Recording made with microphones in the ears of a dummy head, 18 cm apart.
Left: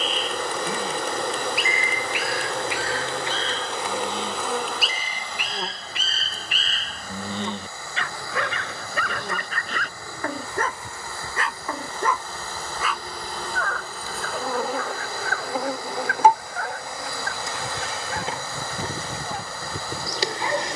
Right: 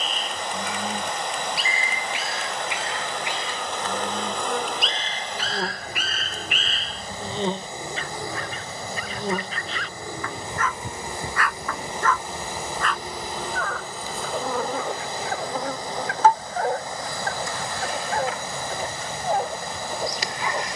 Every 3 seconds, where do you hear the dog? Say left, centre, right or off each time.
right, centre, left, left, centre, right, right.